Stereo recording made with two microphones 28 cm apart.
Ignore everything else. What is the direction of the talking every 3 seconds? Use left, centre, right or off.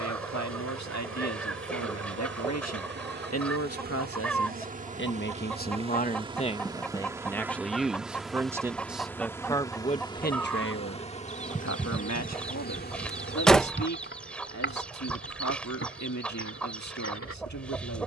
left, left, centre, left, left, left.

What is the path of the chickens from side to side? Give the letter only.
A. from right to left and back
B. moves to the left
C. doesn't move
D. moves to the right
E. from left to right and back
C.